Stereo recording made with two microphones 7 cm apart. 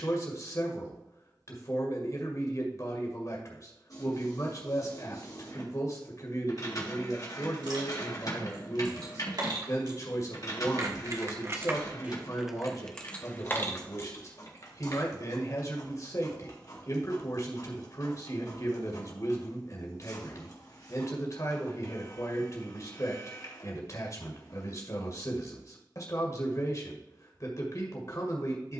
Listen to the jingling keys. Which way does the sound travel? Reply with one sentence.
You can hear the jingling keys move to the left.